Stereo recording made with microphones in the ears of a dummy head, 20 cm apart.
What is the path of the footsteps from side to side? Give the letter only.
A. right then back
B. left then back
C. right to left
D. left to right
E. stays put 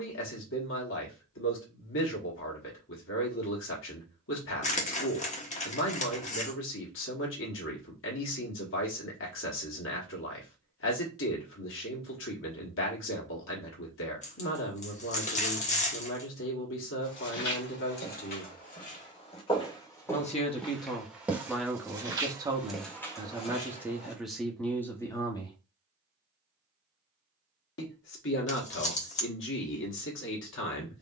A.